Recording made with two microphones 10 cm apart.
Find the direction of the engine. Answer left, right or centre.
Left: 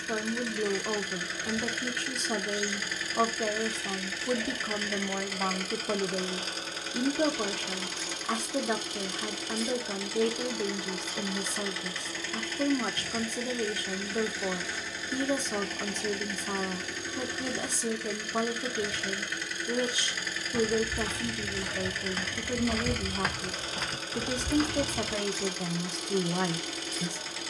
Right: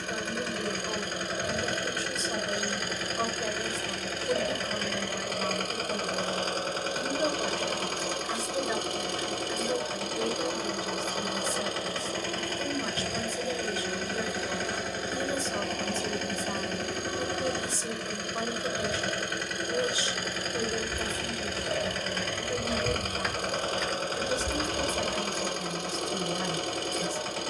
right.